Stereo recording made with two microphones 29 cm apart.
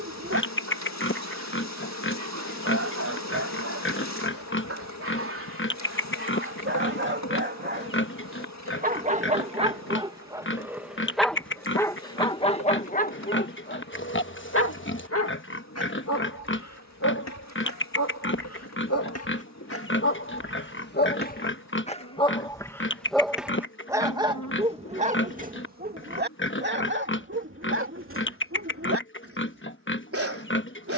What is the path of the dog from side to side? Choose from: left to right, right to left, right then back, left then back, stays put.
left then back.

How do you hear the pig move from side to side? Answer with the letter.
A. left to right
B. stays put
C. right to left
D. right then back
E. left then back
B.